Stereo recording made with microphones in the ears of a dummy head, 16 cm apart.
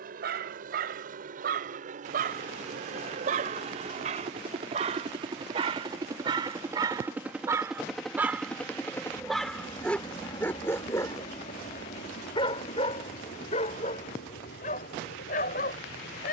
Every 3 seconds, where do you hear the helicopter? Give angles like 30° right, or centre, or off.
50° right, 30° right, 10° right, 30° left, 50° left, 60° left.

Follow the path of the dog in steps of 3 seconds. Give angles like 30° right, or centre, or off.
50° right, 40° right, 20° right, 10° left, 40° left, 50° left.